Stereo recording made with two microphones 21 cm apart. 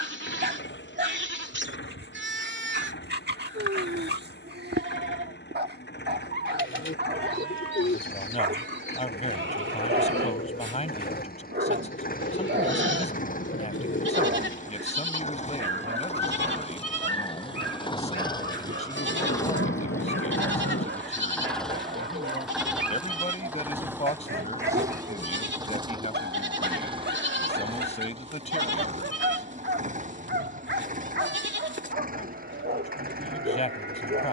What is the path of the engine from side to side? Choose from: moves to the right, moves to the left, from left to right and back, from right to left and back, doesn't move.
moves to the right.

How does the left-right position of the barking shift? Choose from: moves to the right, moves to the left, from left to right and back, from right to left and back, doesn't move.
doesn't move.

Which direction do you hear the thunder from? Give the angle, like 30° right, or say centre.
80° left.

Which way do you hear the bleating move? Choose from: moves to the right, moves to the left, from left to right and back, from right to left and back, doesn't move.
doesn't move.